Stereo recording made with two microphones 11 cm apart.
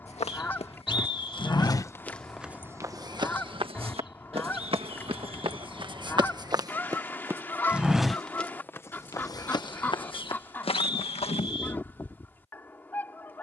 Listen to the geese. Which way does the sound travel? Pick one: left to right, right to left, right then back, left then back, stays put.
stays put.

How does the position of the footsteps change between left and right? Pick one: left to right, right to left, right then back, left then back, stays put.
right then back.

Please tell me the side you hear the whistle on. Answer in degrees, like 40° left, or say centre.
50° left.